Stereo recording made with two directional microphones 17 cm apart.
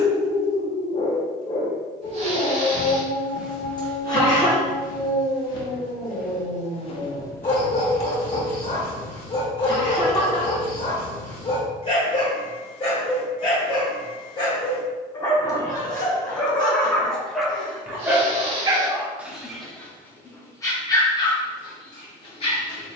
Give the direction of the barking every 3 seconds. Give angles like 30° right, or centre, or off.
30° left, 30° left, 30° left, 30° left, 30° left, 10° left, centre, 30° left.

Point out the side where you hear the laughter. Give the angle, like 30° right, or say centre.
30° left.